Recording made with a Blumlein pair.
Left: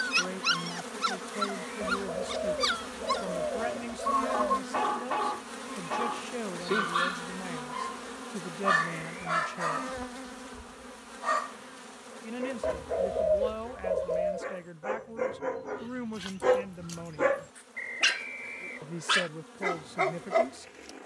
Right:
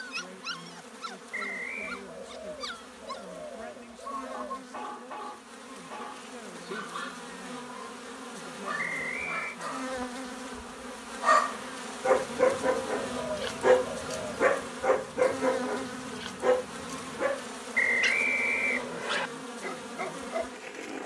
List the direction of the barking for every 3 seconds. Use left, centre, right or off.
left, left, left, centre, right, centre, left.